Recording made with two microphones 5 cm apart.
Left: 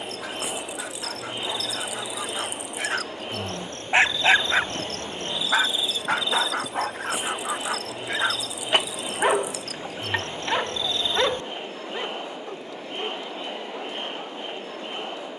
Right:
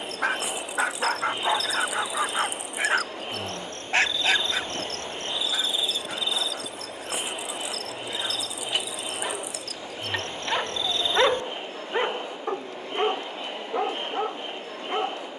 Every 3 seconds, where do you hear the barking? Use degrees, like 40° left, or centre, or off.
40° right, 30° left, 60° left, 10° left, 50° right.